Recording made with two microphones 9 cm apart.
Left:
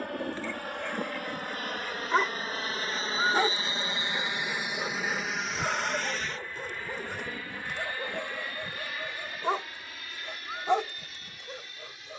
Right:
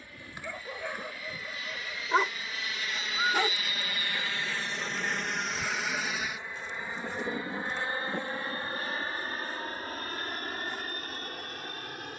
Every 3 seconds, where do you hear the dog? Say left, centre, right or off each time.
centre, left, left, left.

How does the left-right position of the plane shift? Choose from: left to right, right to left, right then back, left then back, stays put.
left to right.